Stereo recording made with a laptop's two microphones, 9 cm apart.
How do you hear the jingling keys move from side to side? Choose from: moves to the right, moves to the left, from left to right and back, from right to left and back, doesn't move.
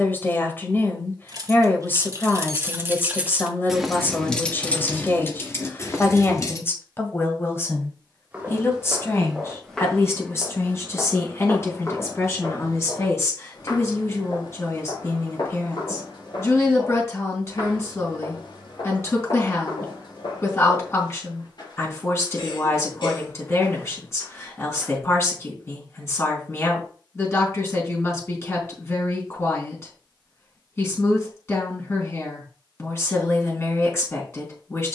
moves to the left.